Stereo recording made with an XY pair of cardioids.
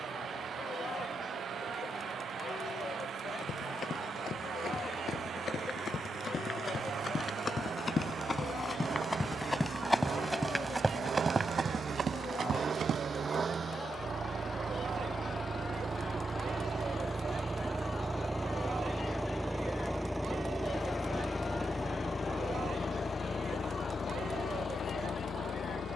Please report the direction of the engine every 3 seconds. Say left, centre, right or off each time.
right, right, right, right, right, right, centre, left, left.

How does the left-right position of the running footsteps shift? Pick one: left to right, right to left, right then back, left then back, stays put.
left to right.